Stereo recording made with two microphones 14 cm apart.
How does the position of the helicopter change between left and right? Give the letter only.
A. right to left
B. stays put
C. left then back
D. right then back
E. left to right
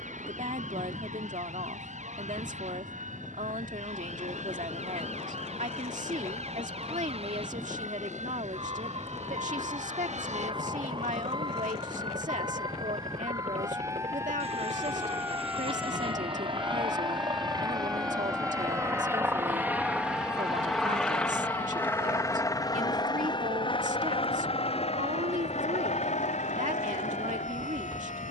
A.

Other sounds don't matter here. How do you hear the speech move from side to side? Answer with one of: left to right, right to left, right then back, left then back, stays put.
stays put.